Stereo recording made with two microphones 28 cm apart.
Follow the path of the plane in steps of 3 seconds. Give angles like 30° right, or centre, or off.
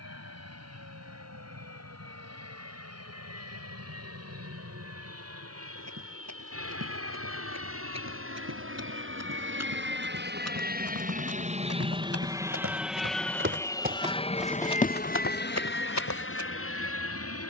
70° right, 70° right, 60° right, 40° right, 10° left, 40° left.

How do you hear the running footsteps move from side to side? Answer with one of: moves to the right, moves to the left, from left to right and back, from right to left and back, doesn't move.
moves to the left.